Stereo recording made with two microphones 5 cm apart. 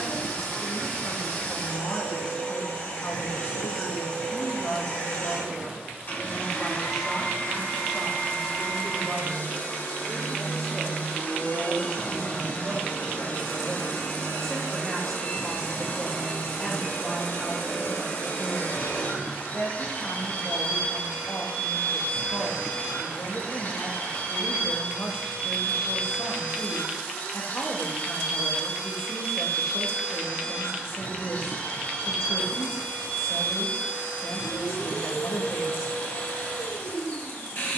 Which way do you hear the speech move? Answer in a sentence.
You can hear the speech go right and come back.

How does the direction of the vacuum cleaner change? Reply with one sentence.
You can hear the vacuum cleaner stay in one place.